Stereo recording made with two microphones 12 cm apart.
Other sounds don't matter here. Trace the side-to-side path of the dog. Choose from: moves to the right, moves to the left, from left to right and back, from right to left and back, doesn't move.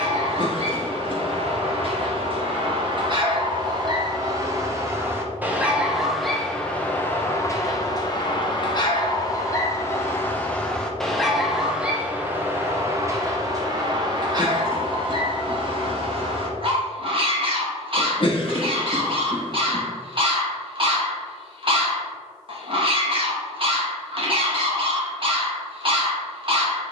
from right to left and back.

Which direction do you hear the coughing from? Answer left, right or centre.
left.